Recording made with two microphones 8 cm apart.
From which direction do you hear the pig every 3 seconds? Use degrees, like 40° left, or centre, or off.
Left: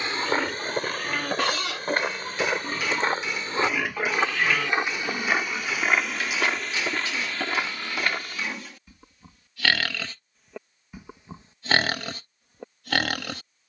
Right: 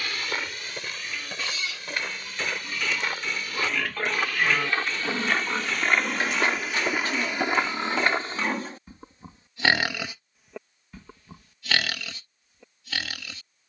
60° left, centre, 40° right, centre, 60° left.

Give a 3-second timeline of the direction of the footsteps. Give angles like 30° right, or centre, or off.
40° left, 20° left, 20° right, off, off.